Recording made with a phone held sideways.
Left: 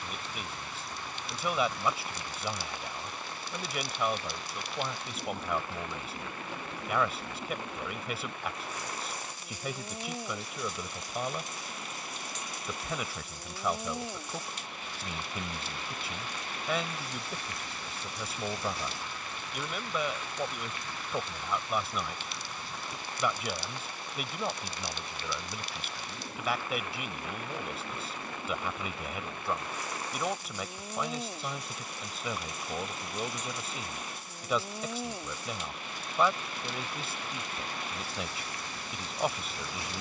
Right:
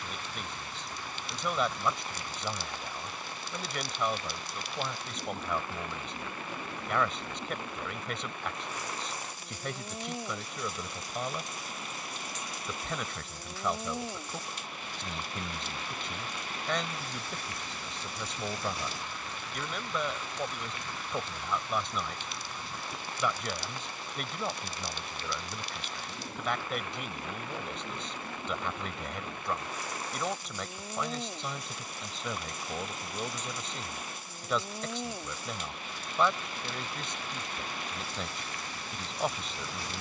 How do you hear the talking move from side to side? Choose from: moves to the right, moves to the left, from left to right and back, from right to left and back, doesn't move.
doesn't move.